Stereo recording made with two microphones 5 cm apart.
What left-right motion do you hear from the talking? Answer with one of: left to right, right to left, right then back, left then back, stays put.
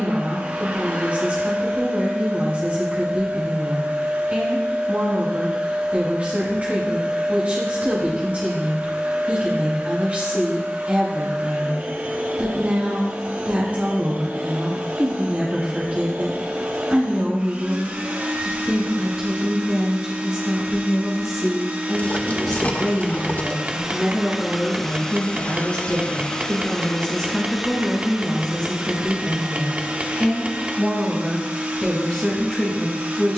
right to left.